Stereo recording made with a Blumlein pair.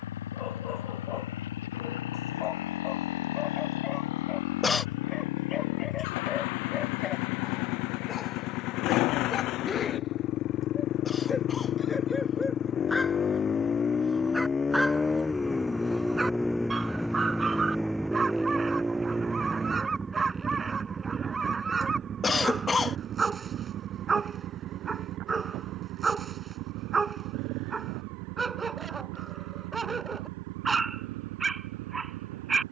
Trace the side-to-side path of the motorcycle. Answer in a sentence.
You can hear the motorcycle go from the left side to the right.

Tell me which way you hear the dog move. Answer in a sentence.
In this clip you hear the dog travel towards the right.